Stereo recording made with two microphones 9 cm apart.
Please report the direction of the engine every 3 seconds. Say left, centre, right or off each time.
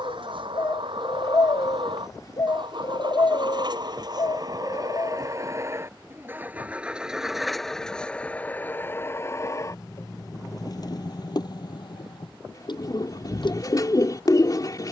right, right, centre, left, left.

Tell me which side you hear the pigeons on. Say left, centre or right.
left.